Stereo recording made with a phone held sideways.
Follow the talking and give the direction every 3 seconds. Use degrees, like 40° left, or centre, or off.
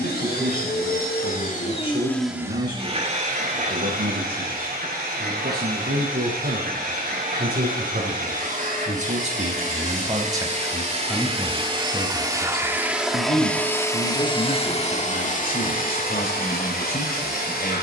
80° right, 80° right, 60° right, 20° right, 50° left, 70° left.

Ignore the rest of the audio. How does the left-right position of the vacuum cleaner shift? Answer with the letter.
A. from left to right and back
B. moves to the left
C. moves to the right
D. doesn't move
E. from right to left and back
A.